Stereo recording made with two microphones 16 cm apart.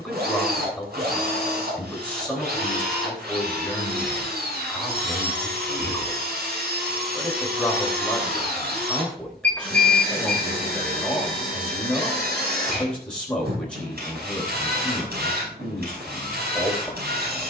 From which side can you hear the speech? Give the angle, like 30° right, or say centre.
10° left.